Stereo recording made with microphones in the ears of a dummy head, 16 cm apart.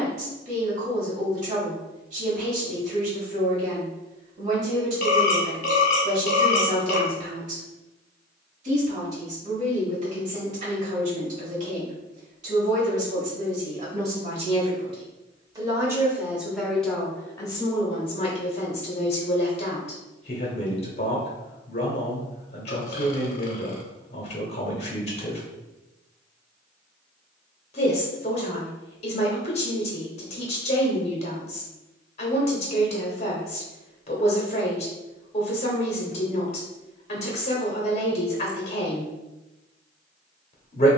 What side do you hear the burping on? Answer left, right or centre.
left.